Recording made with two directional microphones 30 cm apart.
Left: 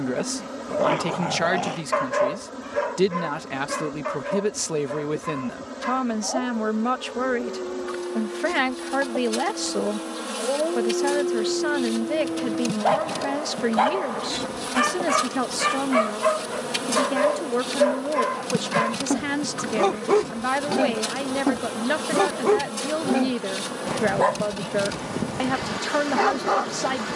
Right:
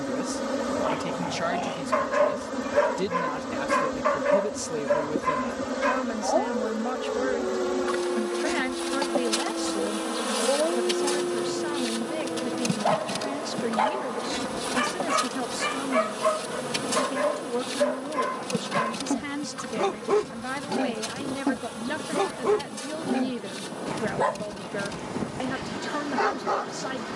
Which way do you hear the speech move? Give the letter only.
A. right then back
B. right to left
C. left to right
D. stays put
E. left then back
D.